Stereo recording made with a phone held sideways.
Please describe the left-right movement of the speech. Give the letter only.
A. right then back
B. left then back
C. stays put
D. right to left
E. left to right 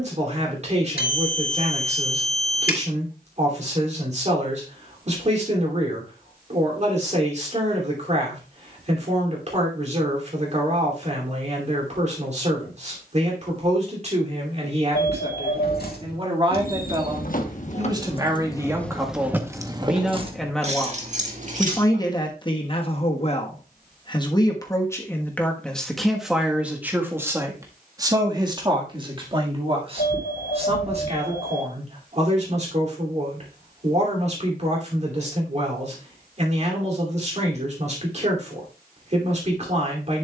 B.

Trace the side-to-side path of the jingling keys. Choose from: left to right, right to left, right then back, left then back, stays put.
left to right.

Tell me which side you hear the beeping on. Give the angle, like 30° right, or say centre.
70° left.